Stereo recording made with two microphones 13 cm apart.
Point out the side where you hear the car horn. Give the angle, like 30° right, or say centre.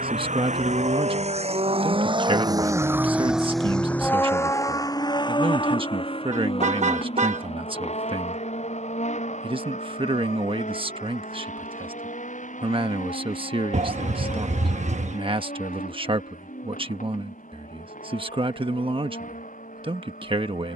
60° right.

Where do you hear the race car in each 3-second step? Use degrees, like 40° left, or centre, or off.
50° right, 20° left, 50° left, 60° left, 60° left, 60° left, 70° left.